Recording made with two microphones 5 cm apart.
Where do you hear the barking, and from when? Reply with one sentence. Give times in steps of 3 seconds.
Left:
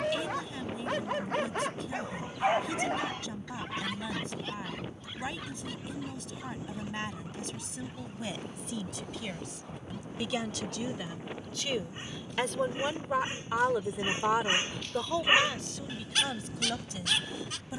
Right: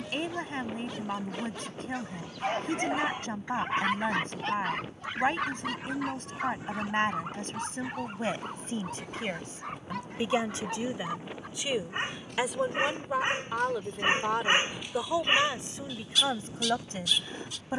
In this clip you hear the barking on the left from 0 s, on the right from 3 s and on the left from 15 s.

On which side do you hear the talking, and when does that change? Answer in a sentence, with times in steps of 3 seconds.
In this clip you hear the talking on the right from 0 s, in the centre from 12 s and on the right from 15 s.